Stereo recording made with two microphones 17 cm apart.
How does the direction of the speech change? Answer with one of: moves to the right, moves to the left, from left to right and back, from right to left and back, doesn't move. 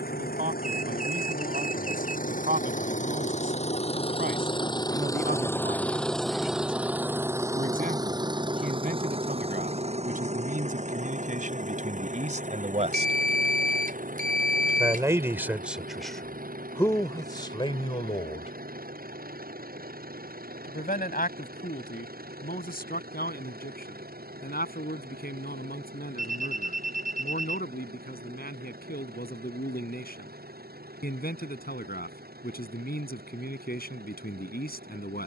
moves to the left.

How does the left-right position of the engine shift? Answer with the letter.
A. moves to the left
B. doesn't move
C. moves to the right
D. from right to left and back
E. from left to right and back
C.